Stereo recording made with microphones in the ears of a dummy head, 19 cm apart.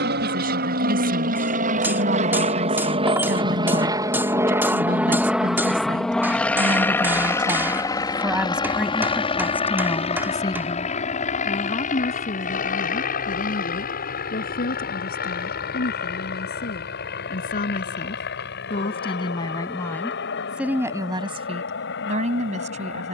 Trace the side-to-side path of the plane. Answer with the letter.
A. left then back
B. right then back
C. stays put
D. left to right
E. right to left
E.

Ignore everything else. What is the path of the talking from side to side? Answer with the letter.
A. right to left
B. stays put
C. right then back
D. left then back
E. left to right
D.